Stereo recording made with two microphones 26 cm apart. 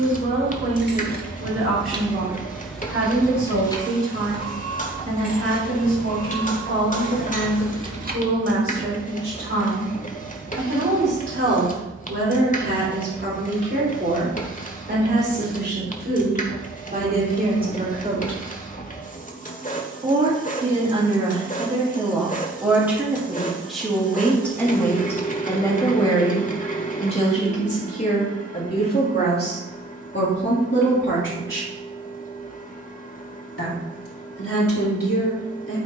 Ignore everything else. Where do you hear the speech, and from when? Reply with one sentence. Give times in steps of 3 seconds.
In this clip you hear the speech on the right from 0 s, in the centre from 21 s and on the left from 27 s.